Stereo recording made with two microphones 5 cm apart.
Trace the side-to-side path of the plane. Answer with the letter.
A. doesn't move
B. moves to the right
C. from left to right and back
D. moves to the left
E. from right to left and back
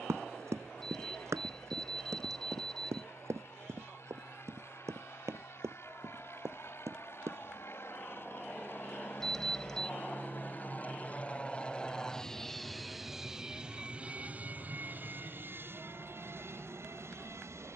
B.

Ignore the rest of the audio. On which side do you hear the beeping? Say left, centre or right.
centre.